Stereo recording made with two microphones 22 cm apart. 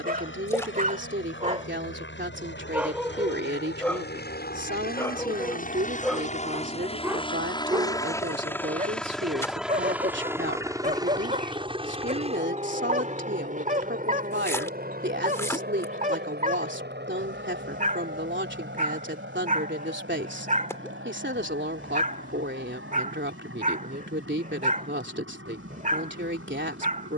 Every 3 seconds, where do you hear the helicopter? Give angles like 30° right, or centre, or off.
60° left, 50° left, 20° left, 10° right, 30° right, 50° right, 50° right, 60° right, 60° right.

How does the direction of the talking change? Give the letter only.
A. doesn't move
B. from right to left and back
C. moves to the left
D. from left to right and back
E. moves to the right
A.